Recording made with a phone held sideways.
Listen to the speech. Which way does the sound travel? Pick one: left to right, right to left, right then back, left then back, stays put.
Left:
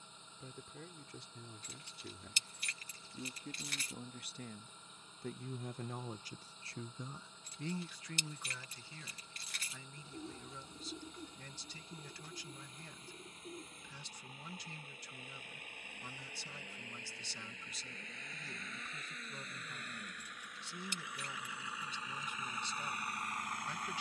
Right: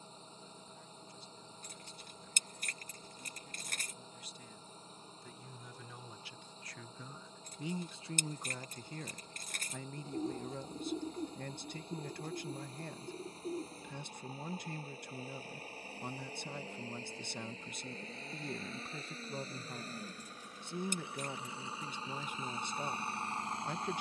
left to right.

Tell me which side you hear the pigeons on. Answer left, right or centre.
right.